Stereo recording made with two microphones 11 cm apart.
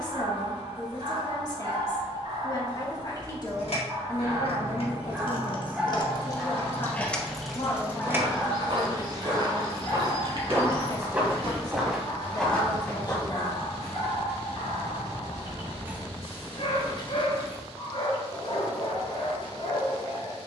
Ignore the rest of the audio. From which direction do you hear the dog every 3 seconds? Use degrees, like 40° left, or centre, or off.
50° right, 20° right, 10° left, 40° left, 60° left, 60° left, 60° left.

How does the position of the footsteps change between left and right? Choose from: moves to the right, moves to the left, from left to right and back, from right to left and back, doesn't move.
moves to the left.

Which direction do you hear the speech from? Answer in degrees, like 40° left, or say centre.
40° left.